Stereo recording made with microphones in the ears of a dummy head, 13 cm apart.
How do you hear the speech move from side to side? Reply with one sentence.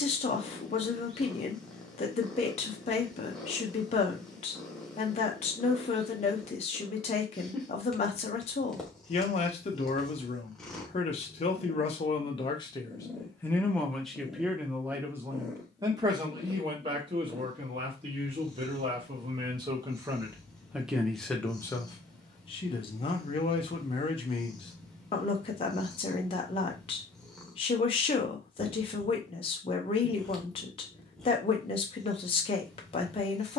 You can hear the speech move from left to right and back again.